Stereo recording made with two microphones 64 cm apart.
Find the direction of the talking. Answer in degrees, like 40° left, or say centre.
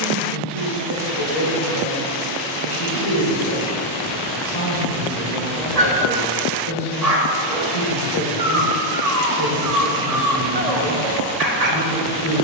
50° left.